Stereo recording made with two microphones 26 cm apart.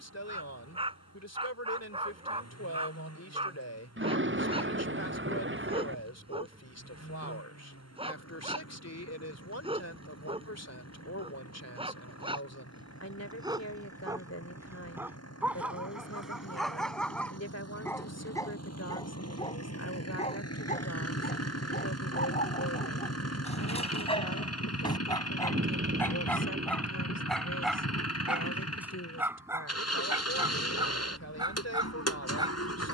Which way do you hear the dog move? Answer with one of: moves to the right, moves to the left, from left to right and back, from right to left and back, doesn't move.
from right to left and back.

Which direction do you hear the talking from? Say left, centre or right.
left.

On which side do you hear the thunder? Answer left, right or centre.
right.